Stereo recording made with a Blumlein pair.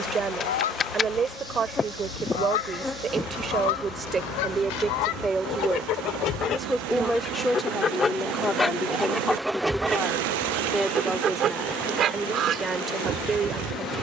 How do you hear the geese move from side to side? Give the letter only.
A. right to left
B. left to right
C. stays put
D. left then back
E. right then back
B.